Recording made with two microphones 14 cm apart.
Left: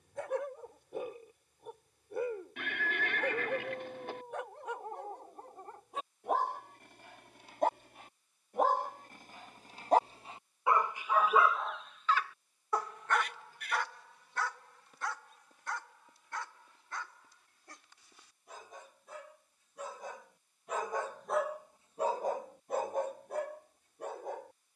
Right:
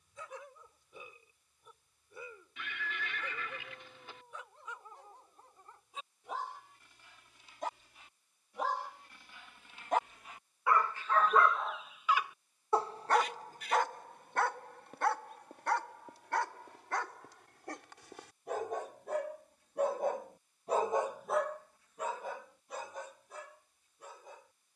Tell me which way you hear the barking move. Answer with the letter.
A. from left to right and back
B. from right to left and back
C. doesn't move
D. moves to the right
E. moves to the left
A.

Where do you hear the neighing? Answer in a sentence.
You can hear the neighing on the left.